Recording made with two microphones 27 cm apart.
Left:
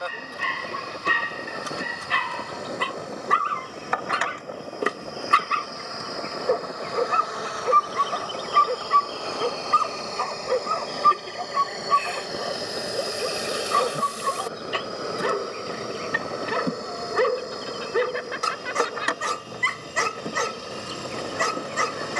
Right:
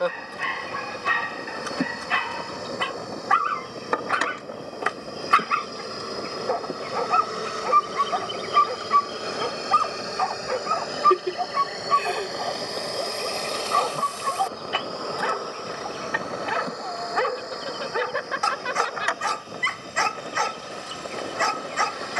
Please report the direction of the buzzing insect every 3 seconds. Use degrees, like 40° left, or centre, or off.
50° right, 40° right, 30° right, 10° right, 10° left, 30° left, 50° left, 50° left.